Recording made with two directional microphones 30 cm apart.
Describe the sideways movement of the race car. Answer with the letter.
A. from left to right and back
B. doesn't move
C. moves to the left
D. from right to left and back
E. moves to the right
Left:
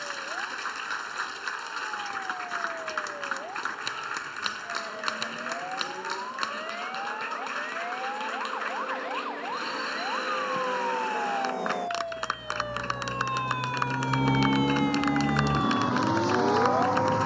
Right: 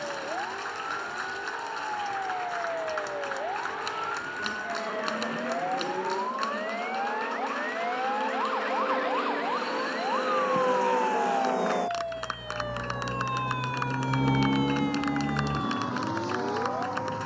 C.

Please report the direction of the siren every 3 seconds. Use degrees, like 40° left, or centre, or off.
50° right, 50° right, 40° right, 20° right, 10° left, 40° left.